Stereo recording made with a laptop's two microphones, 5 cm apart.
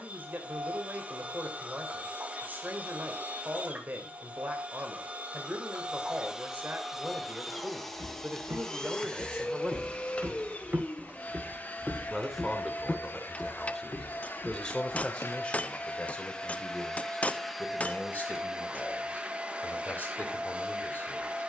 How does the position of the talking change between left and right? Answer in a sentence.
You can hear the talking move from right to left.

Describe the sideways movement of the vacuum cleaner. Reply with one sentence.
You can hear the vacuum cleaner go left and come back.